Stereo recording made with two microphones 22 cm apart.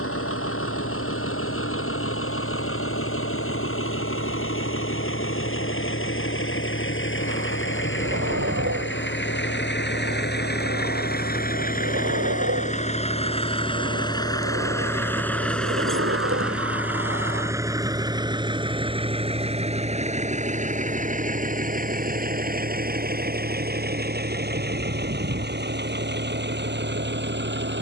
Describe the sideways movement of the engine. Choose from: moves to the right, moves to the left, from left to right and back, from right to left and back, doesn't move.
moves to the right.